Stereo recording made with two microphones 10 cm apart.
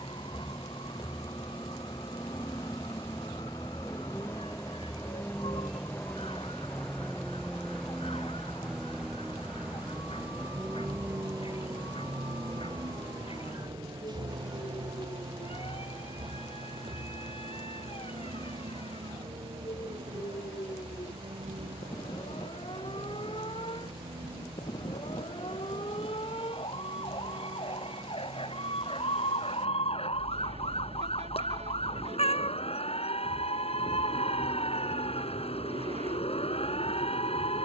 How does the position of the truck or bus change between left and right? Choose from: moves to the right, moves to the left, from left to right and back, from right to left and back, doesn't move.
moves to the right.